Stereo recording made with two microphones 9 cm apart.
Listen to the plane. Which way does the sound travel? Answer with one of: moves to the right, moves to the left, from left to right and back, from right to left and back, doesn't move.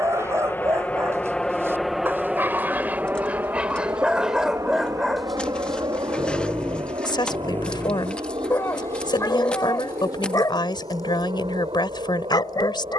moves to the right.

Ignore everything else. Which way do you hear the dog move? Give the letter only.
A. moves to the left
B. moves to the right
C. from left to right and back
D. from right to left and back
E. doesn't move
A.